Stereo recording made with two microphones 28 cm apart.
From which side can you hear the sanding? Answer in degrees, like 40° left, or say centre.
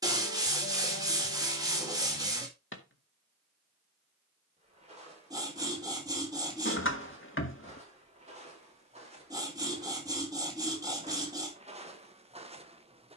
10° right.